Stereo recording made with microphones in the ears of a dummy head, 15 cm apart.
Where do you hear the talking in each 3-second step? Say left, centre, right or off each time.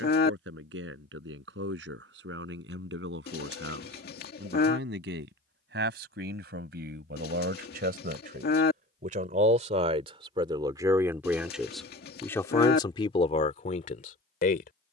right, right, right, right, left.